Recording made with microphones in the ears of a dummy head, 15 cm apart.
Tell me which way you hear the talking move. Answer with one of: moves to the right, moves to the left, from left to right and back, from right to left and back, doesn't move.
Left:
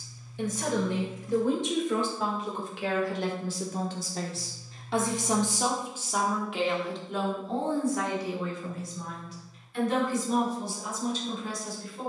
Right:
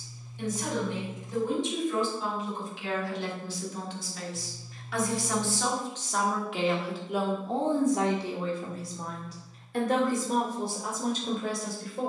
moves to the right.